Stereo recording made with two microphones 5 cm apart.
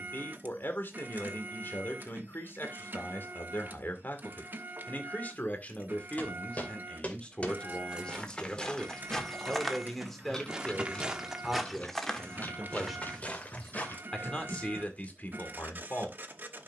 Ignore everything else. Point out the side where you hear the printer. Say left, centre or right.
right.